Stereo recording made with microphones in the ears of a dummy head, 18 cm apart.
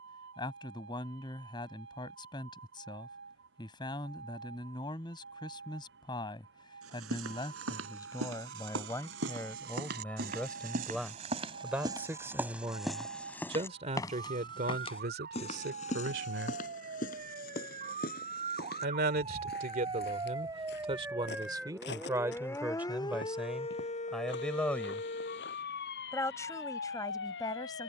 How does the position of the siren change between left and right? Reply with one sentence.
In this clip you hear the siren travel towards the left.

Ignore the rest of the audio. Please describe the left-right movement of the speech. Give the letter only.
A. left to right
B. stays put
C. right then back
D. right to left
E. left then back
C.